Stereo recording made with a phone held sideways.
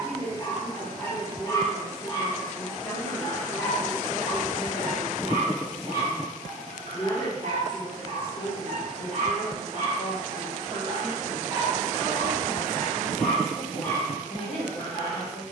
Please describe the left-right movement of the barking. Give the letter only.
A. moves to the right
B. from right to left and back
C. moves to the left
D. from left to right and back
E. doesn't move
D.